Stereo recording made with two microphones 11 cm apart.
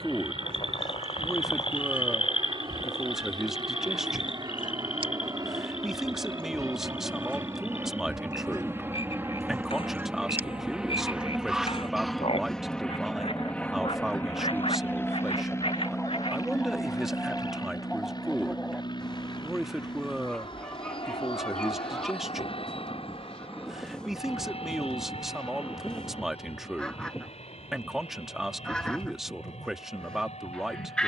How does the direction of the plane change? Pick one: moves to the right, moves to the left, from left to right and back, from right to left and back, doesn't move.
moves to the left.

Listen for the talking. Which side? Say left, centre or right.
centre.